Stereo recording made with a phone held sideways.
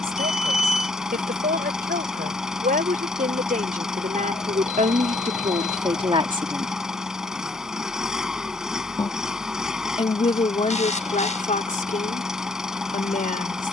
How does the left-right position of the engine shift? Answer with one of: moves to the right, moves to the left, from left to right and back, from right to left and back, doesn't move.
doesn't move.